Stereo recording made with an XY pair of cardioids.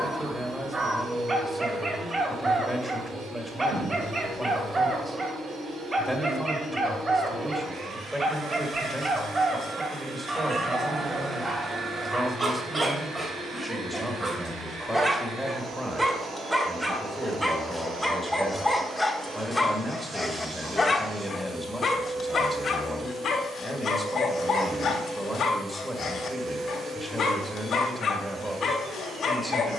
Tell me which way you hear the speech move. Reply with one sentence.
You can hear the speech stay in one place.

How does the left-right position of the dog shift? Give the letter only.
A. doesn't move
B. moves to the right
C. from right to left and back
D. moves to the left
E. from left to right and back
D.